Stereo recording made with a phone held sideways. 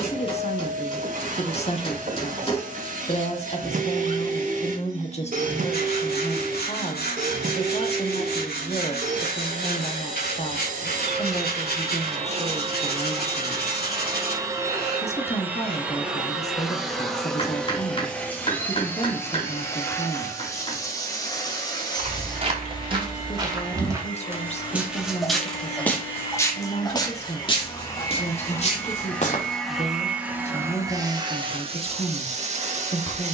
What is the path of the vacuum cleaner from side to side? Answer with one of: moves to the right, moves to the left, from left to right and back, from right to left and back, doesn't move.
from right to left and back.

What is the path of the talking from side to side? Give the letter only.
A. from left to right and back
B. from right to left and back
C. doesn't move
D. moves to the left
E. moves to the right
C.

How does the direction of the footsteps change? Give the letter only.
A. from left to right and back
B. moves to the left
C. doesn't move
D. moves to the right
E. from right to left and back
B.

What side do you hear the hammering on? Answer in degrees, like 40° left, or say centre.
30° left.